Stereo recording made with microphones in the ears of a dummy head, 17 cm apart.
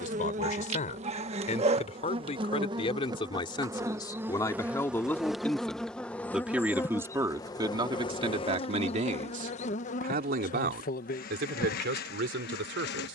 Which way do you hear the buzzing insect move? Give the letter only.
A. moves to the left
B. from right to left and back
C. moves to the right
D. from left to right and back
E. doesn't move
A.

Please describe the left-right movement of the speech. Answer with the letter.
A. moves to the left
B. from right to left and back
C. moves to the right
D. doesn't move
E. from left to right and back
C.